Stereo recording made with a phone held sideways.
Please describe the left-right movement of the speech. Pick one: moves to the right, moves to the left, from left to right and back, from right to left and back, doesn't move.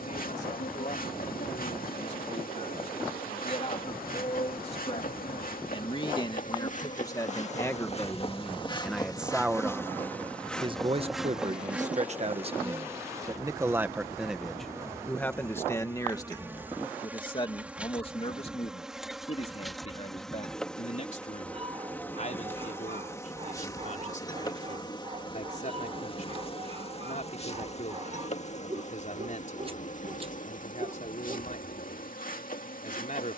from left to right and back.